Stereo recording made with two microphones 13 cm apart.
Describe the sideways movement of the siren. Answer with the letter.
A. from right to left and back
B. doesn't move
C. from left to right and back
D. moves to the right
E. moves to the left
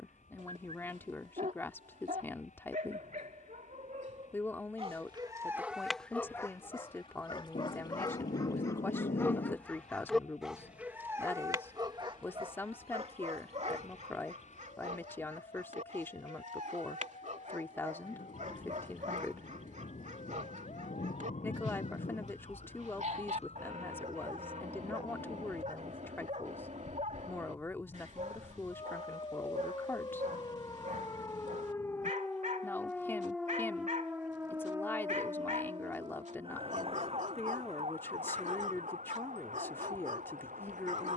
D.